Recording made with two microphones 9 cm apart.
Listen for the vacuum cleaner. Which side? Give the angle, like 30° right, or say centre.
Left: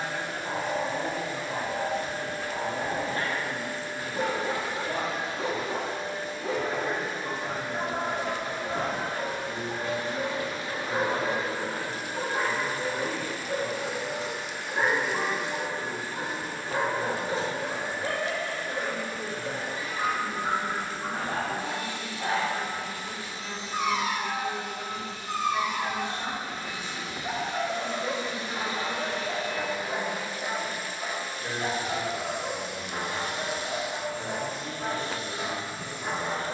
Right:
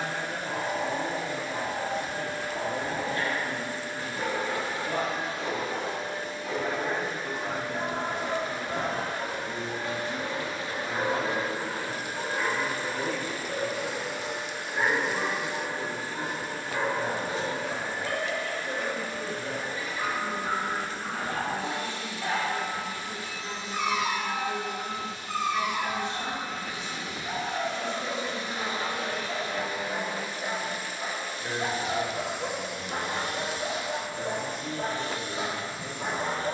20° right.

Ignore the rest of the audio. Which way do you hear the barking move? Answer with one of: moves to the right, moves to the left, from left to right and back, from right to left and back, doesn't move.
moves to the right.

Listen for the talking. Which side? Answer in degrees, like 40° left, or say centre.
20° right.